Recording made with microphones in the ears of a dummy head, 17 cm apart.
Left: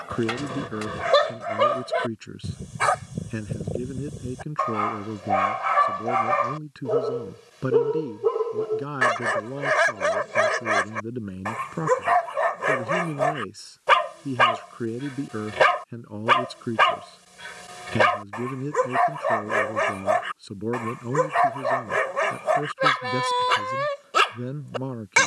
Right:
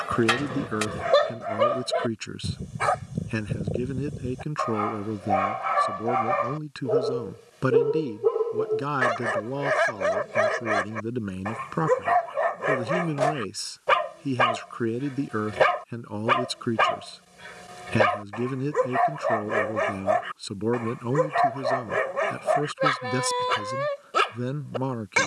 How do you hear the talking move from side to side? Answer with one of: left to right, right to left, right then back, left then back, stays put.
stays put.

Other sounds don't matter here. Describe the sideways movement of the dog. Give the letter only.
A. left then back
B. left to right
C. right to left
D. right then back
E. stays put
E.